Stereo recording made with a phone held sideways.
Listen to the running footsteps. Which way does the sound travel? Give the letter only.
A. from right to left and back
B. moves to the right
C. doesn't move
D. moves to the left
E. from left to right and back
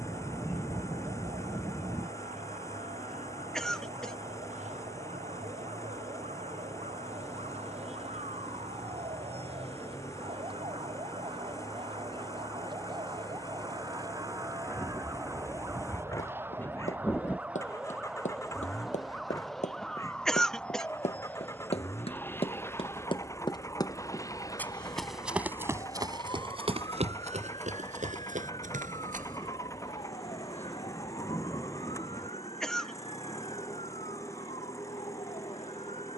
B.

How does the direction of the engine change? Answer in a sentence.
In this clip you hear the engine stay put.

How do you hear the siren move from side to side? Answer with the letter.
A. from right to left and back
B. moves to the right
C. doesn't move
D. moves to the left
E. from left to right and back
D.